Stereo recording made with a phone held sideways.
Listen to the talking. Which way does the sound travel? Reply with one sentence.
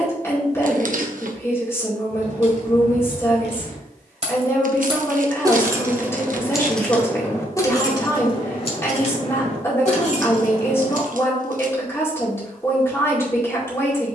You can hear the talking stay put.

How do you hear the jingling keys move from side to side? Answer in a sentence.
You can hear the jingling keys move from right to left.